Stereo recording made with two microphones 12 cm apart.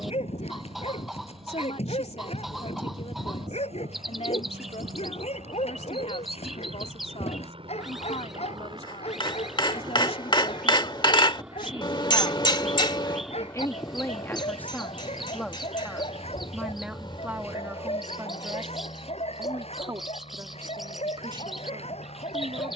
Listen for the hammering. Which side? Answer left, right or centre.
left.